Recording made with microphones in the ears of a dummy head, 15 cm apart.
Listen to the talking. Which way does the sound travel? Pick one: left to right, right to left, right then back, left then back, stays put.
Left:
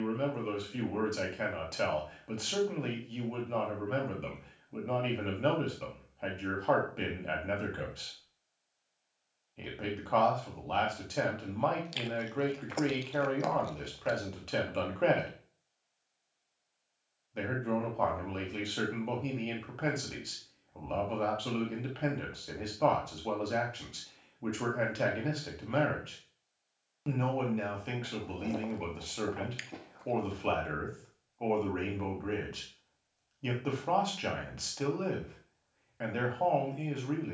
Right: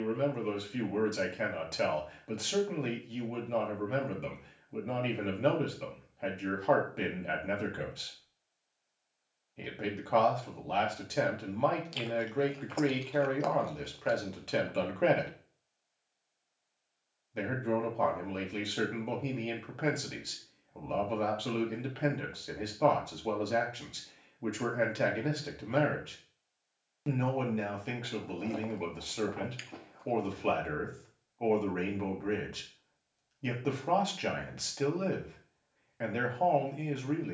stays put.